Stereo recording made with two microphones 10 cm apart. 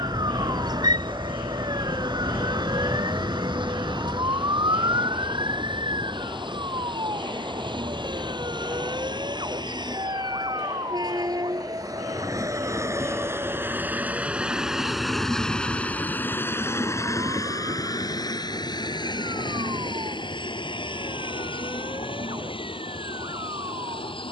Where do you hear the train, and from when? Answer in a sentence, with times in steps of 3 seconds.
You can hear the train on the right from 0 s and on the left from 15 s.